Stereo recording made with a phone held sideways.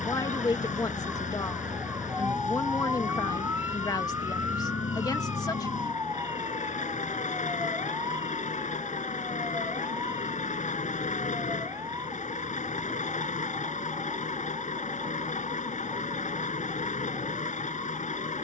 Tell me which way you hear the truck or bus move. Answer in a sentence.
In this clip you hear the truck or bus stay put.